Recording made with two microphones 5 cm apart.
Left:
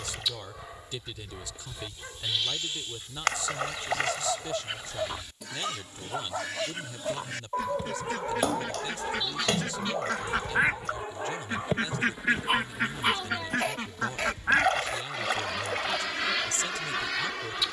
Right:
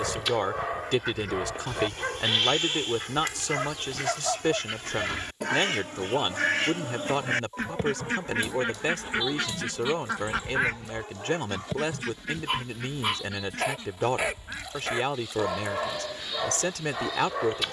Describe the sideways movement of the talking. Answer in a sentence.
You can hear the talking stay in one place.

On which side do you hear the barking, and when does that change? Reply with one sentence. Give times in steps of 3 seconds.
In this clip you hear the barking on the right from 0 s, in the centre from 3 s, on the left from 6 s, in the centre from 12 s and on the right from 15 s.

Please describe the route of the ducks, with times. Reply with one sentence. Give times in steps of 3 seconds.
In this clip you hear the ducks on the right from 0 s, in the centre from 9 s and on the left from 12 s.